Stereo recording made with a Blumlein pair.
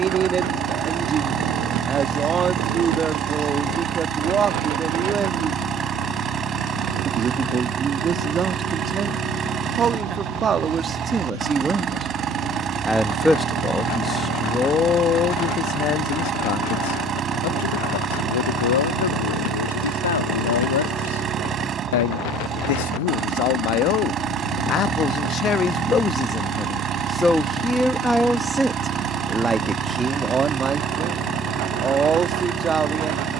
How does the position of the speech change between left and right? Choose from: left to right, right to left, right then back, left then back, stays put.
left then back.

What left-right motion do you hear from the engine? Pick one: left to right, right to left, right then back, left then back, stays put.
stays put.